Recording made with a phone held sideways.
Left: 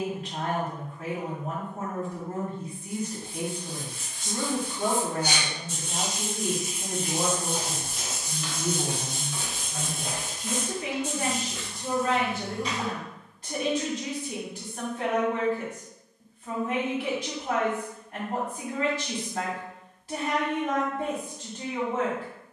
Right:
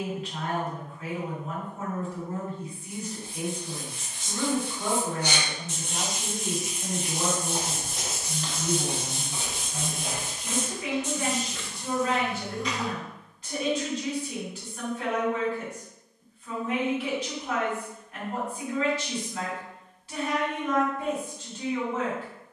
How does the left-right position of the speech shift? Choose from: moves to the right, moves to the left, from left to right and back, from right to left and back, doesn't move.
doesn't move.